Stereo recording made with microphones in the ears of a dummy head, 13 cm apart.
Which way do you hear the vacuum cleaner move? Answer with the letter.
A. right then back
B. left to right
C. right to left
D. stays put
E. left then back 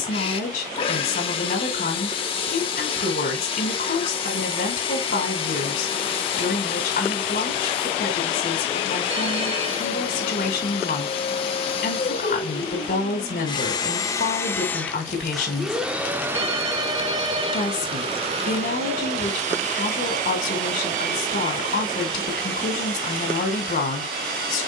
B.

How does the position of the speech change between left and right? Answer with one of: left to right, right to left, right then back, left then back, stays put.
stays put.